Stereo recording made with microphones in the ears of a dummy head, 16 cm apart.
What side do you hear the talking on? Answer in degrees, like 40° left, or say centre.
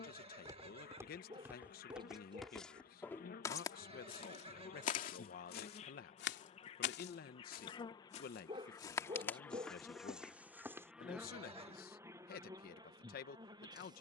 50° left.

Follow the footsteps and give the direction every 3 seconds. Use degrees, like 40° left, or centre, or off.
10° right, 30° left, 50° left, centre, off.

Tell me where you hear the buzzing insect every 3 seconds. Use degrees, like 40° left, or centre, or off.
50° left, 40° left, 30° left, centre, 20° right.